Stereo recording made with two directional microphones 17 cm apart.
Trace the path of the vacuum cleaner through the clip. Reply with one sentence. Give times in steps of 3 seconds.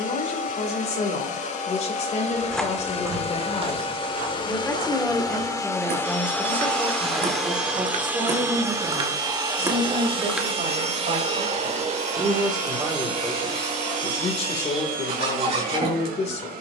In this clip you hear the vacuum cleaner on the left from 0 s, in the centre from 6 s and on the right from 9 s.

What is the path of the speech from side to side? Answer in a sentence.
In this clip you hear the speech move from left to right and back again.